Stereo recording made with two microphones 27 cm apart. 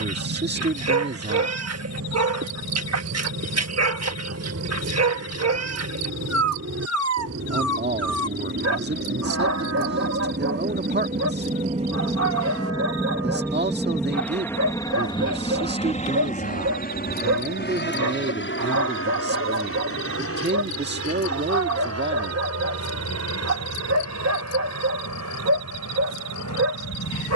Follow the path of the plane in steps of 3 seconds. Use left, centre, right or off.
right, right, right, right, centre, left, left, left, left.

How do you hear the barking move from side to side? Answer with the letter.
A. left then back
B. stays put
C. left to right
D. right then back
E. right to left
B.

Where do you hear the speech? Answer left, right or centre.
right.